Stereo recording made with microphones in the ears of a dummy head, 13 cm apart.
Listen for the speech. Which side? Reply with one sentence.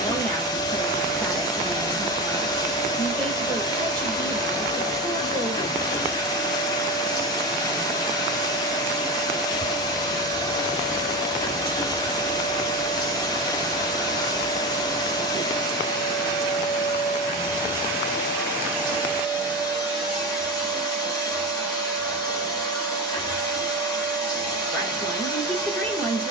You can hear the speech in the centre.